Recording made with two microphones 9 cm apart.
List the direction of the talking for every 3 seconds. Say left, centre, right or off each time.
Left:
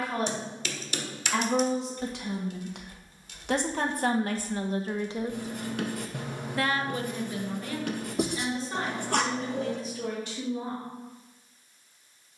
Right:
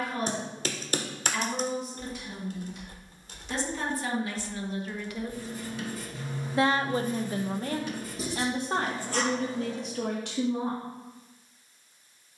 left, left, right, right.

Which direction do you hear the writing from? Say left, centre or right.
left.